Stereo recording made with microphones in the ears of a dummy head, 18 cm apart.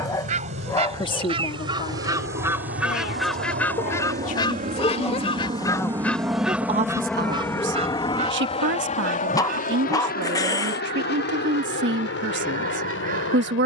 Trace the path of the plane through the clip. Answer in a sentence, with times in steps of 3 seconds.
In this clip you hear the plane on the right from 0 s, in the centre from 6 s and on the left from 9 s.